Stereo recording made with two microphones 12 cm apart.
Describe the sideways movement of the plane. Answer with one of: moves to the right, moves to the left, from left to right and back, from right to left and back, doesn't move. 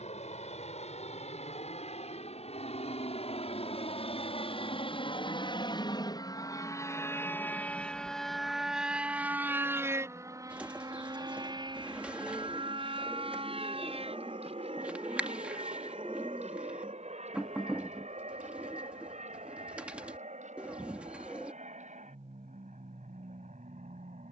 moves to the right.